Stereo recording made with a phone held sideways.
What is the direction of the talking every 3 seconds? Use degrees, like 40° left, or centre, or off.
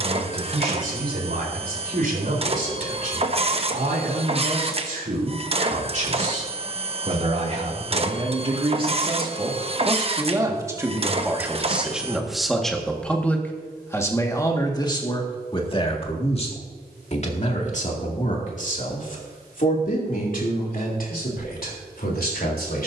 60° right, 50° right, 40° right, 20° right, 10° left, 40° left, 50° left, 60° left.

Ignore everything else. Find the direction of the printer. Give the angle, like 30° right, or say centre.
40° right.